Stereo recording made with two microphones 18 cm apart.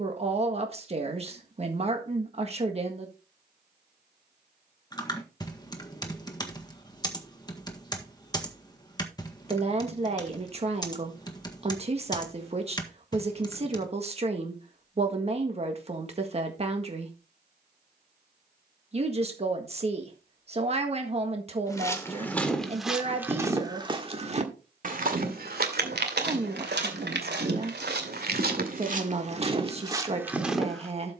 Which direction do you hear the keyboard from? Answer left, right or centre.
left.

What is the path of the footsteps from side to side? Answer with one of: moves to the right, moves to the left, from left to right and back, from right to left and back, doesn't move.
from left to right and back.